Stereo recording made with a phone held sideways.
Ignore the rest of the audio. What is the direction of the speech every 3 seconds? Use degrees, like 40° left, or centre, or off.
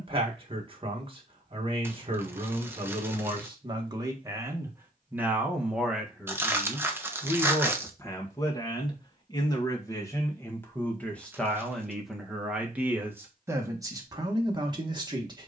40° right, 20° right, 10° left, 10° left, 20° right.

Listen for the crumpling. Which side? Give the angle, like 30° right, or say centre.
10° right.